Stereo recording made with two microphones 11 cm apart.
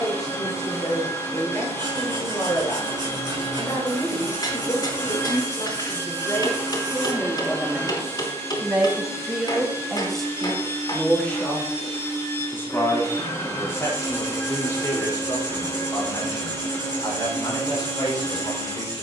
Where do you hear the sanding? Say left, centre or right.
right.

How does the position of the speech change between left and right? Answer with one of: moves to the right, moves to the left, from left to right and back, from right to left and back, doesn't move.
from left to right and back.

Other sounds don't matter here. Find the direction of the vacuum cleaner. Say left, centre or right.
left.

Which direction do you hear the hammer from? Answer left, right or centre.
left.